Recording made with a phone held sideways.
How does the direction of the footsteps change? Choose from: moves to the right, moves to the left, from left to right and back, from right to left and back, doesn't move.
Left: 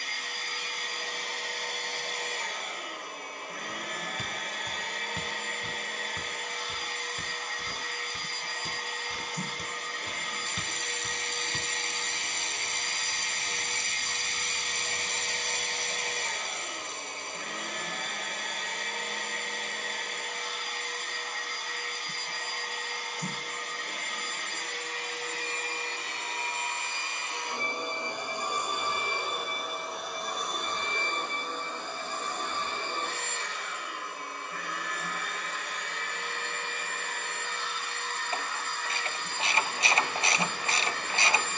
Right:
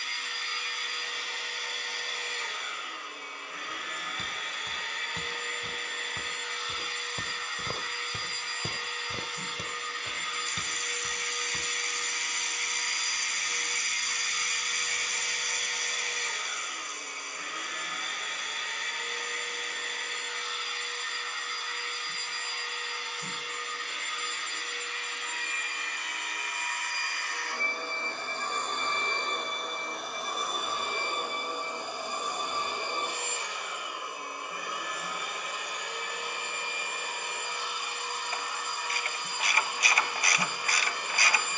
from left to right and back.